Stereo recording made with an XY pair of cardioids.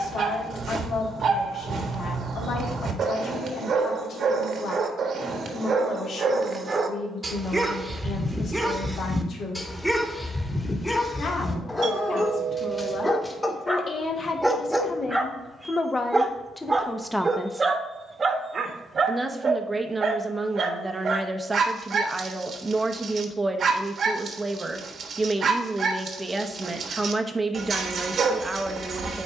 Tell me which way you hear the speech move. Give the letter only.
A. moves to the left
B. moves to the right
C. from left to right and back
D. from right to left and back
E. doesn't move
B.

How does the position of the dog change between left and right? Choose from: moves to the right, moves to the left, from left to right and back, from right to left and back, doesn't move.
from right to left and back.